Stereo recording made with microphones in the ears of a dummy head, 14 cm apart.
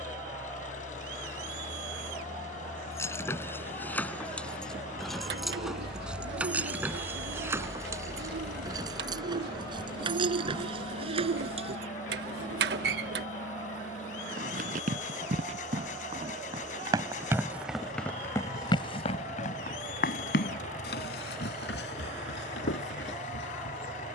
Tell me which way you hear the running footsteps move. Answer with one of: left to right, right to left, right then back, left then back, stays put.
right to left.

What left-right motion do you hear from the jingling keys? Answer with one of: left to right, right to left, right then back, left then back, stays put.
left to right.